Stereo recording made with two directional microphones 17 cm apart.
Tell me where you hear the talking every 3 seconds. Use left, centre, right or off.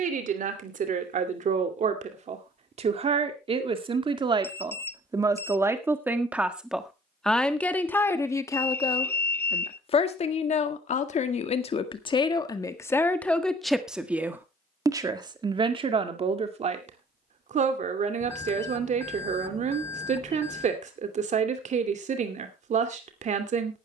right, right, centre, left, centre, right, right, right.